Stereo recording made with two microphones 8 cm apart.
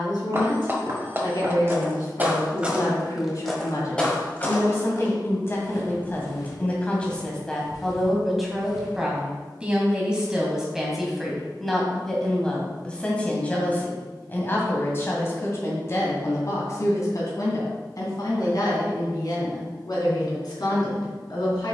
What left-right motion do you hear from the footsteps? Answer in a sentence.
In this clip you hear the footsteps move from right to left.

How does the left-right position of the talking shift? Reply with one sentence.
You can hear the talking go right and come back.